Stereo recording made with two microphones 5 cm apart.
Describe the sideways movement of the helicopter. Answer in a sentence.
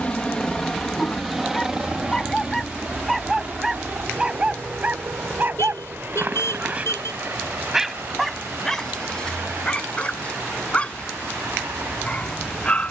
In this clip you hear the helicopter go from the left side to the right.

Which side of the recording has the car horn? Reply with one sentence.
You can hear the car horn on the left.